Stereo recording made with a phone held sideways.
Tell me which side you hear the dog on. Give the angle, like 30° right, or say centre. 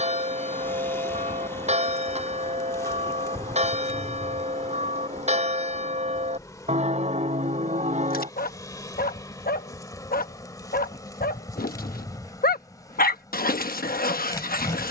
70° left.